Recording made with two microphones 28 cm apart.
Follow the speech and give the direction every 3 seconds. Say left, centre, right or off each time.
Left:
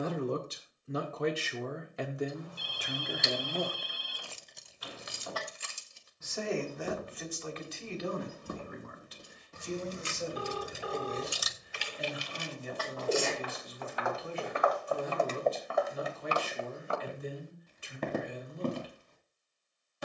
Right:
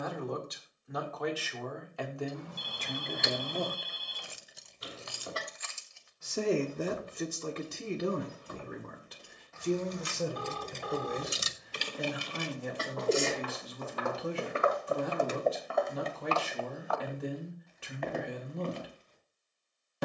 left, centre, right, right, right, right, right.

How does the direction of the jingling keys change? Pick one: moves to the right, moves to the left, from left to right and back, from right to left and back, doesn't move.
from right to left and back.